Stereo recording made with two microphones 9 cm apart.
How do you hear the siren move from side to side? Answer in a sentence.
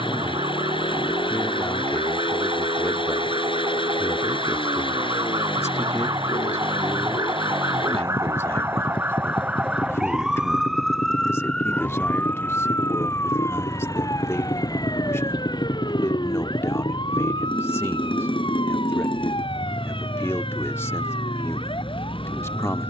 In this clip you hear the siren travel towards the left.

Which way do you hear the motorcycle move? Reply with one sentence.
You can hear the motorcycle stay put.